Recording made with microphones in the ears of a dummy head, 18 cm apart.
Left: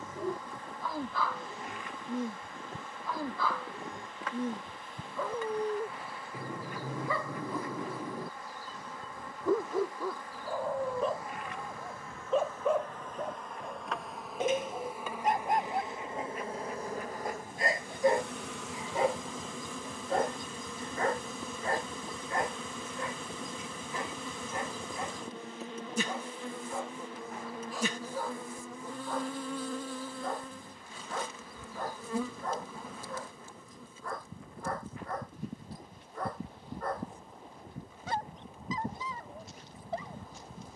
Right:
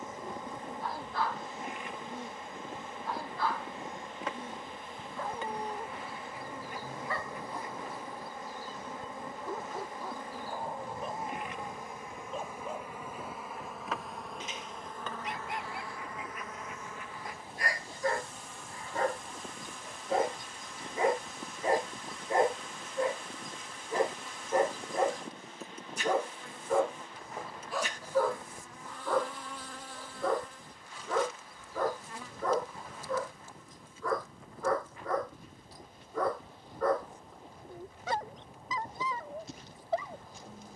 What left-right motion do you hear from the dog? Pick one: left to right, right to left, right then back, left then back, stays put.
left to right.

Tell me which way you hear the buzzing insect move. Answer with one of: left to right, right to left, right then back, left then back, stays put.
right to left.